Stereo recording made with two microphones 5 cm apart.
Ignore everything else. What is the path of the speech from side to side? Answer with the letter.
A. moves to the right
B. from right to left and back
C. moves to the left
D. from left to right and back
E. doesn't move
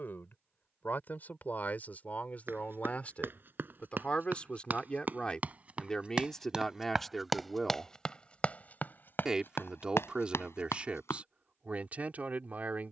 A.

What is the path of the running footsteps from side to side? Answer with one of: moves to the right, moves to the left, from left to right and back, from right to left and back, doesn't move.
moves to the left.